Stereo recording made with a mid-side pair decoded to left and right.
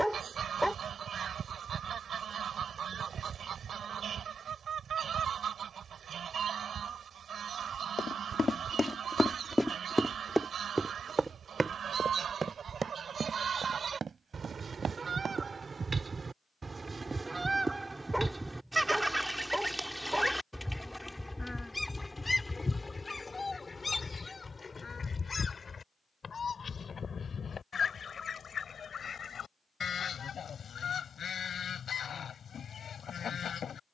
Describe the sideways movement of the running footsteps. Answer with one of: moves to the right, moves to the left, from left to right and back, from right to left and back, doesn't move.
moves to the right.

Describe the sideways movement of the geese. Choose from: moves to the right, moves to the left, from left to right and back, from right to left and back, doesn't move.
moves to the left.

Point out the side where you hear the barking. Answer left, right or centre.
centre.